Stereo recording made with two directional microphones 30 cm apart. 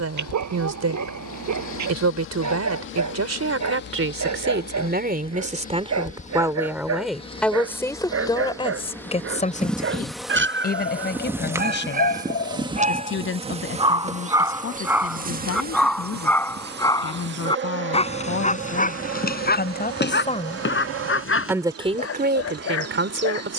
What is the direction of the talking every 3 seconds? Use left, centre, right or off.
right, right, centre, left, left, left, left, right.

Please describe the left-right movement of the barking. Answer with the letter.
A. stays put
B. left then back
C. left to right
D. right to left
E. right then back
D.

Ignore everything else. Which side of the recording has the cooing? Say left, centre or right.
left.